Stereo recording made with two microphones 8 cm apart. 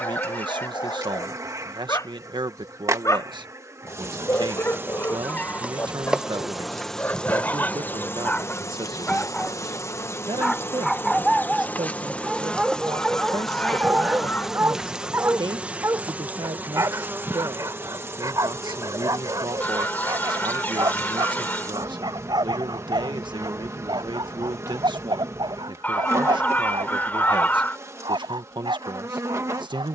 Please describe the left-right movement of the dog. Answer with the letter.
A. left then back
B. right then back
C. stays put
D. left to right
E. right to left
D.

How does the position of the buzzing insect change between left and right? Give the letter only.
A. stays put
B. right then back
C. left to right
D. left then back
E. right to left
D.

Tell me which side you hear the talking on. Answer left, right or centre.
right.